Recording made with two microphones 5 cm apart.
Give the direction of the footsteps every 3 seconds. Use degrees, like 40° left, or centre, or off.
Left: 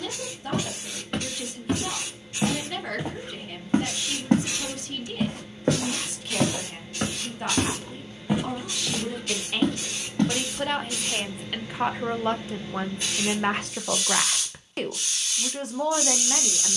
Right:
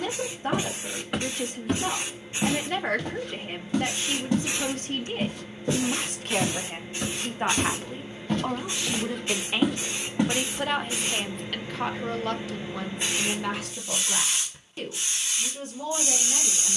centre, 50° left, 30° left, 10° right, off, off.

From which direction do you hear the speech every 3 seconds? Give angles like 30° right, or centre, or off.
40° right, 40° right, 30° right, 10° right, 40° left, 70° left.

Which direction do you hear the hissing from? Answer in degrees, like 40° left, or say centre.
20° right.